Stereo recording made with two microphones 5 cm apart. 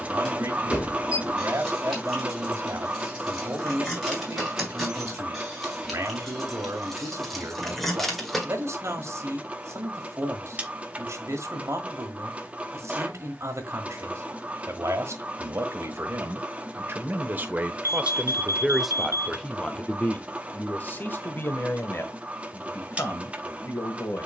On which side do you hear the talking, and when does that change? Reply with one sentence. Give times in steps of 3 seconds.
In this clip you hear the talking on the right from 0 s, in the centre from 18 s and on the left from 21 s.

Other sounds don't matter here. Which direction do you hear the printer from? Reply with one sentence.
In this clip you hear the printer on the right.